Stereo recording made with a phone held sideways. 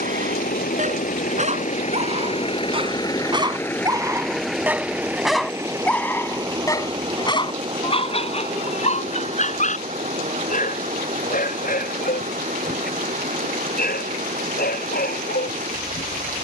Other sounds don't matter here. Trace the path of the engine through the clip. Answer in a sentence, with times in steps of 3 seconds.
You can hear the engine on the left from 0 s, in the centre from 3 s and on the right from 6 s.